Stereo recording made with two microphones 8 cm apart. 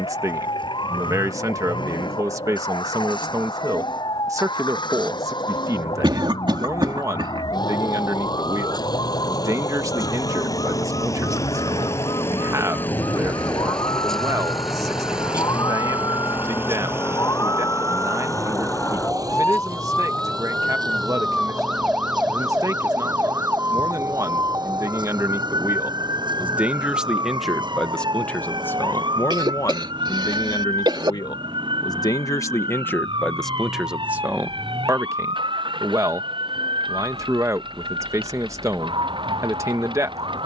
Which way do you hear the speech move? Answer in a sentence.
In this clip you hear the speech go left and come back.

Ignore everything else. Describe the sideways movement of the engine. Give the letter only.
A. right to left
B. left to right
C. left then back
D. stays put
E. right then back
B.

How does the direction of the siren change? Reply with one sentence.
In this clip you hear the siren move to the right.